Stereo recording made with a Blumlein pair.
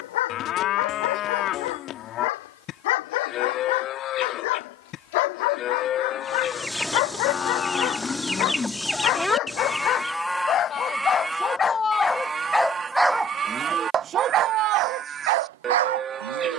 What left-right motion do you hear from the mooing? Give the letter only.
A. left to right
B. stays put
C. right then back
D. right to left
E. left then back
A.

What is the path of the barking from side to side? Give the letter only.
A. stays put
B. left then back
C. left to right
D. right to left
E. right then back
C.